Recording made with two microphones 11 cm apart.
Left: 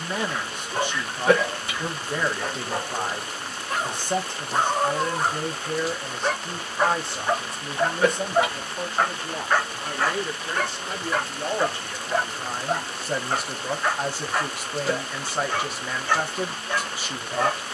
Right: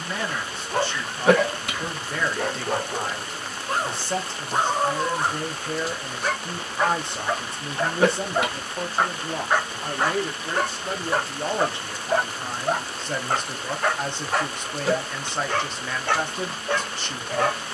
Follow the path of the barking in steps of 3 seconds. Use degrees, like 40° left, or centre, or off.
70° right, 20° right, 10° left, 30° right, 60° right, 70° right.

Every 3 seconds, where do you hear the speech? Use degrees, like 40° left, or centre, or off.
20° left, 10° left, 20° right, 40° right, 10° left, 10° left.